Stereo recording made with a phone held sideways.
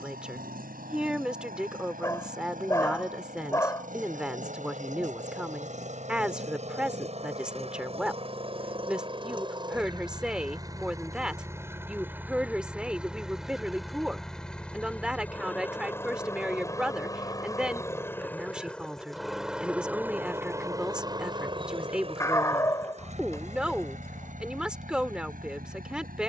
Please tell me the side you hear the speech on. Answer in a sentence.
You can hear the speech in the centre.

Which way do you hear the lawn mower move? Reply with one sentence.
In this clip you hear the lawn mower move from right to left and back again.